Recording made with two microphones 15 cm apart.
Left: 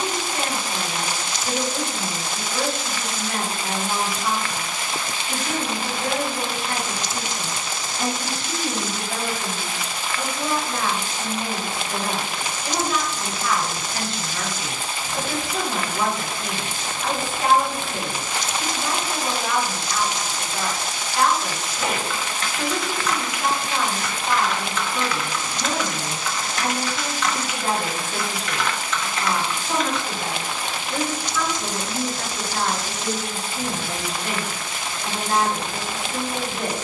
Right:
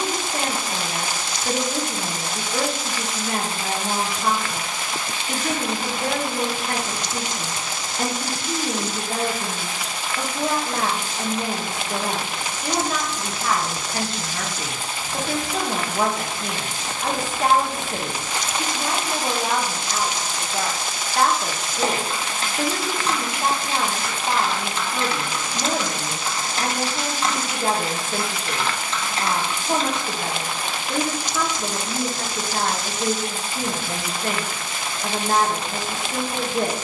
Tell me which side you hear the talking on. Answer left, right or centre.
right.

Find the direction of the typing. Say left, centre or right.
right.